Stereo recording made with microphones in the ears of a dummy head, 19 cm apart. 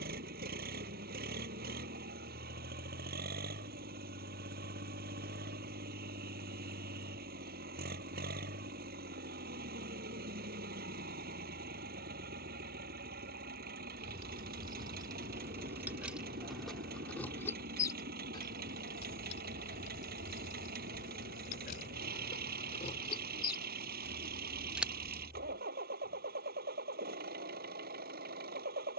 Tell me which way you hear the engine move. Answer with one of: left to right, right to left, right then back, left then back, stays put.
stays put.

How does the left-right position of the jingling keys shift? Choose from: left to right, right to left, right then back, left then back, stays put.
left then back.